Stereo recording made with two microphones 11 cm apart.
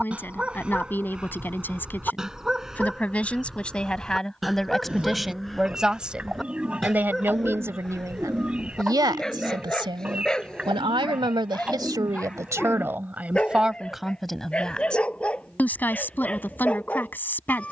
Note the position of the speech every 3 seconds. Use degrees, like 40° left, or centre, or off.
20° left, centre, 20° right, 50° right, 10° right, 20° left.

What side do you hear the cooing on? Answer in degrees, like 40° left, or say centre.
10° right.